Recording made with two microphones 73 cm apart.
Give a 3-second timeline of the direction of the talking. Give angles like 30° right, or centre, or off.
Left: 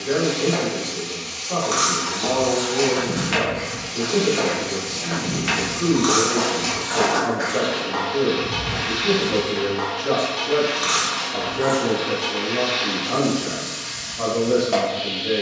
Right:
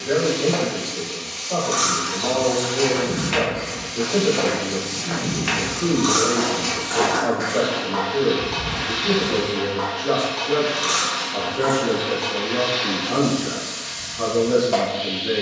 50° left, 50° left, 50° left, 10° left, 20° right.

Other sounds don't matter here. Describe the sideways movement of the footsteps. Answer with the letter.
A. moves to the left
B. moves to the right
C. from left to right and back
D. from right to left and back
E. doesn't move
C.